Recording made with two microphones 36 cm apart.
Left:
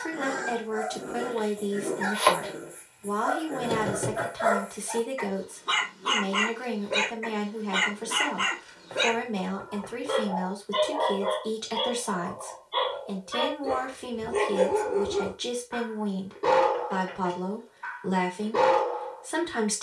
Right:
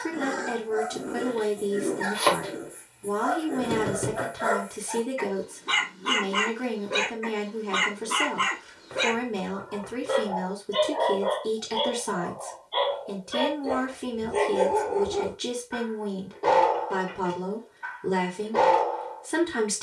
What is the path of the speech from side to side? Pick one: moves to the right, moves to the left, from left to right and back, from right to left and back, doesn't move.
doesn't move.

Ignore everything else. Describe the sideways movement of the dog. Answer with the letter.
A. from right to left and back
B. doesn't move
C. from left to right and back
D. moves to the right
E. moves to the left
E.